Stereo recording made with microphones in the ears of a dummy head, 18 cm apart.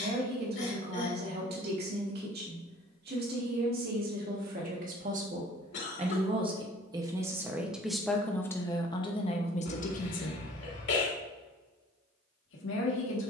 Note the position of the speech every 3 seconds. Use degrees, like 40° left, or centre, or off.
50° right, 50° right, 10° right, 40° left, 70° left.